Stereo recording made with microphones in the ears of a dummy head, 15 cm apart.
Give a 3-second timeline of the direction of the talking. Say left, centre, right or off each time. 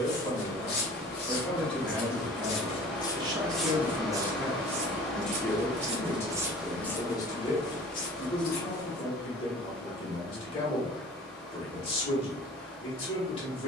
centre, centre, left, left, left.